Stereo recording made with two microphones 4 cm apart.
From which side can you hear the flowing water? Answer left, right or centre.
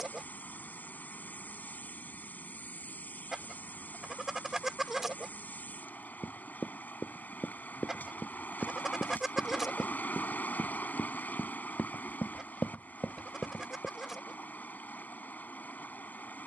left.